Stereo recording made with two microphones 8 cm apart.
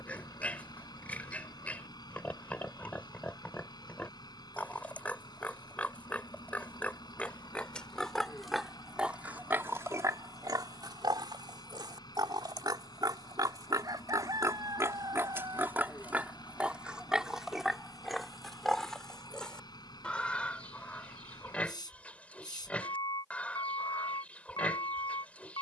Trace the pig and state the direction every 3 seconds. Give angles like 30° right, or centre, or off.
20° left, 20° left, 10° left, 50° right, 50° right, 20° right, 10° left, 20° left, 20° left.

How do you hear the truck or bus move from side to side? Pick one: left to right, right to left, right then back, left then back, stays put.
stays put.